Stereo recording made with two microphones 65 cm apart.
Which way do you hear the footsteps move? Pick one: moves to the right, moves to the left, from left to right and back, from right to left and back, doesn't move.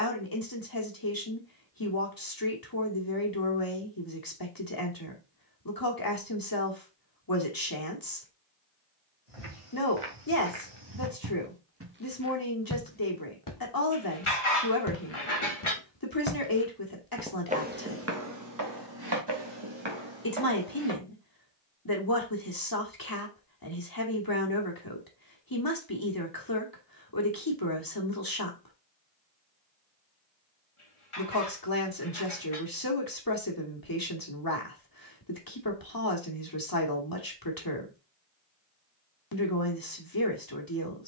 from right to left and back.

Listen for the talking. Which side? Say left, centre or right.
left.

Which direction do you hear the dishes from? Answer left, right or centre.
left.